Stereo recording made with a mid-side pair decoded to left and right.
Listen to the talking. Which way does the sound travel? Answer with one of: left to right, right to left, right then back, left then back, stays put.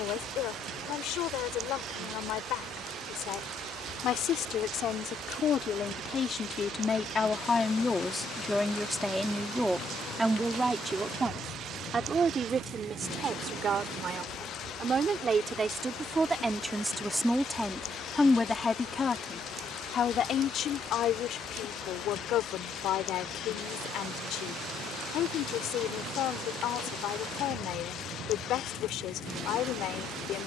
right then back.